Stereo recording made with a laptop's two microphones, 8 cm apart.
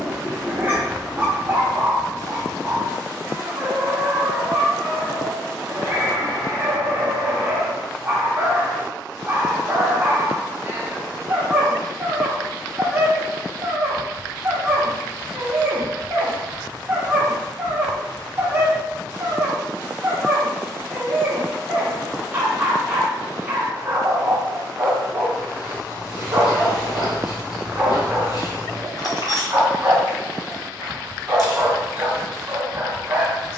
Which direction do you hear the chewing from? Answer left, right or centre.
left.